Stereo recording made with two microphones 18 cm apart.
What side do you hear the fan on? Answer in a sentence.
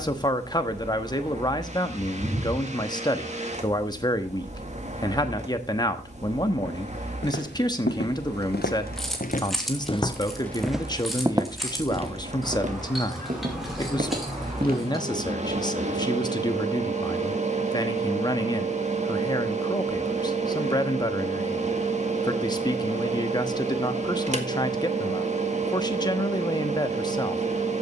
You can hear the fan on the right.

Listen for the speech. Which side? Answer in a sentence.
You can hear the speech on the left.